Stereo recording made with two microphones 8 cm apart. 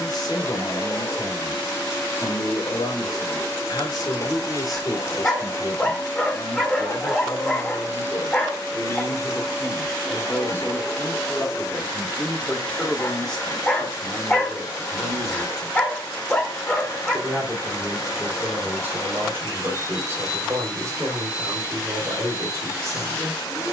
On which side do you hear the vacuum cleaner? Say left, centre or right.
left.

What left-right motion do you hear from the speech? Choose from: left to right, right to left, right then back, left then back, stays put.
left to right.